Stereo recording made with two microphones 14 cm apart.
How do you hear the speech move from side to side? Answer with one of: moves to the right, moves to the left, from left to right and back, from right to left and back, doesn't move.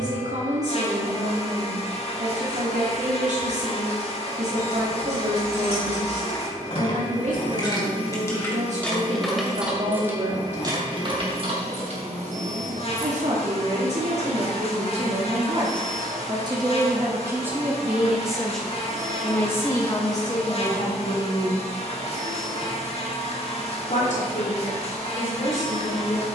moves to the left.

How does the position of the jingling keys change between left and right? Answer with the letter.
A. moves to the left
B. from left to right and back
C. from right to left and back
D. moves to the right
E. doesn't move
D.